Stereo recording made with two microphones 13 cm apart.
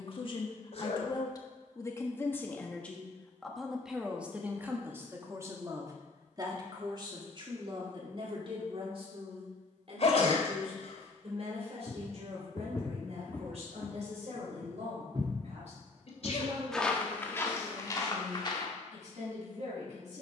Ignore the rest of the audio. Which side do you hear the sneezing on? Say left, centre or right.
left.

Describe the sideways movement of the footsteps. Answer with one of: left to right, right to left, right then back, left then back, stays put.
right then back.